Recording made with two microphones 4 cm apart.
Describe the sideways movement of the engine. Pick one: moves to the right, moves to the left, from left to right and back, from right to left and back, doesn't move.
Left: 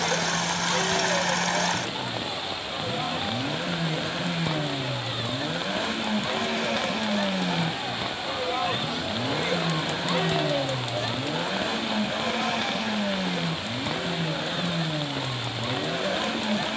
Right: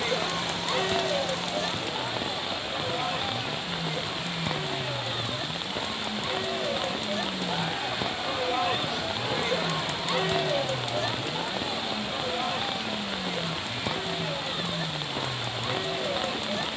doesn't move.